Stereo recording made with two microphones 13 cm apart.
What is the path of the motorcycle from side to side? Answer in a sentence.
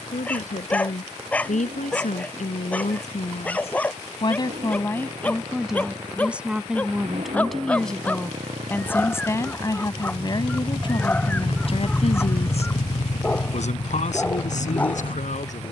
In this clip you hear the motorcycle move to the left.